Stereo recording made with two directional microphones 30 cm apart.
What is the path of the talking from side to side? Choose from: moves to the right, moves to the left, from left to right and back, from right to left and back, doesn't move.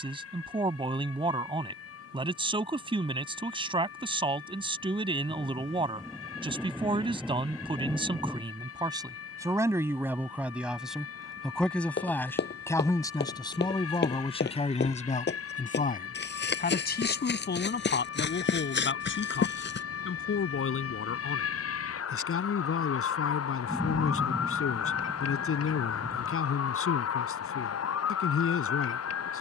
moves to the left.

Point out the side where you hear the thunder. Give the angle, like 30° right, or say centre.
centre.